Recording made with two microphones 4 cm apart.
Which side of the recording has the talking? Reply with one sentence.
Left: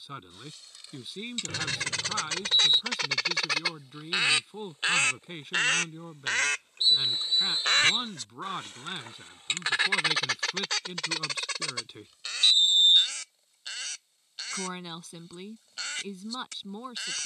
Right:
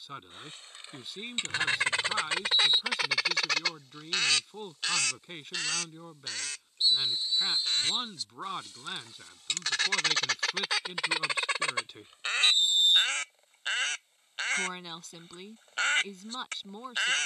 In this clip you hear the talking in the centre.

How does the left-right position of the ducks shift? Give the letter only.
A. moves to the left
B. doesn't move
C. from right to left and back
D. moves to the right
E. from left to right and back
C.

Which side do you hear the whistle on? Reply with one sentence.
You can hear the whistle on the left.